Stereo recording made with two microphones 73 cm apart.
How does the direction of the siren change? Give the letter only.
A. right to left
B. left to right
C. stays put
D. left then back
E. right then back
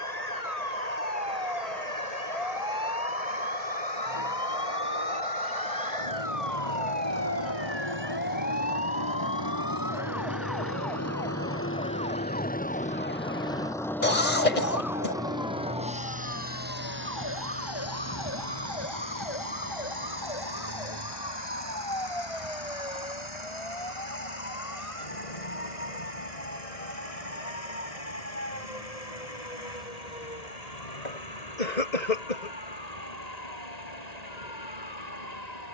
A.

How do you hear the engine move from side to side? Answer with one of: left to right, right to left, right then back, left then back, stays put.
left to right.